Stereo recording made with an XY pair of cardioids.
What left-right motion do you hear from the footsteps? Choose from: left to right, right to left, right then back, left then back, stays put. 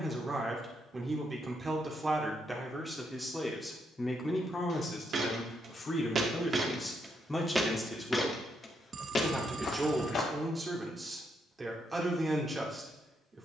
right to left.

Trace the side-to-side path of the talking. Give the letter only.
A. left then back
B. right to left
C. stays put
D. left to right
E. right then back
A.